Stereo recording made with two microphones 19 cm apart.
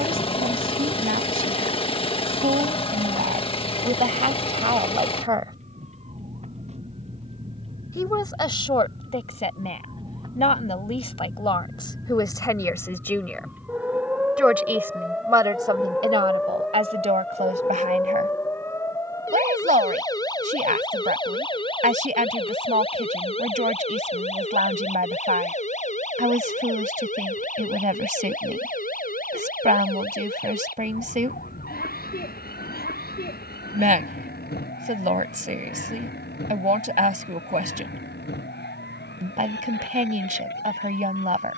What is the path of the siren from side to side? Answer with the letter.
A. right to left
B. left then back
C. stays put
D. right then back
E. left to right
A.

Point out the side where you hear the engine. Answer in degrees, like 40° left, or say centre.
30° left.